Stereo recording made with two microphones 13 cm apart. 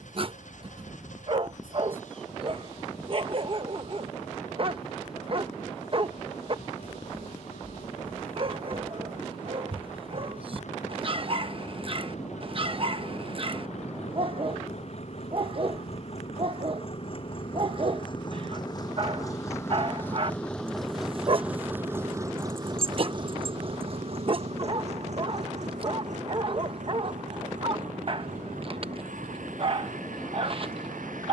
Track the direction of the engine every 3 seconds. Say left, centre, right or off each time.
left, left, left, left, left, left, left, right, right, right, right.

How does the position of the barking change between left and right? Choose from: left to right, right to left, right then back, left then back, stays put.
stays put.